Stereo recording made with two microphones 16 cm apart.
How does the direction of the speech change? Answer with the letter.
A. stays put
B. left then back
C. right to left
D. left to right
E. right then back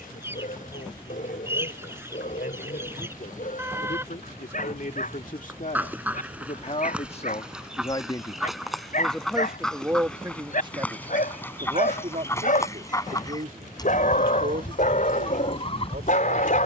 D.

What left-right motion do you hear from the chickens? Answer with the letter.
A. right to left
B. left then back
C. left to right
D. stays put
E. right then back
A.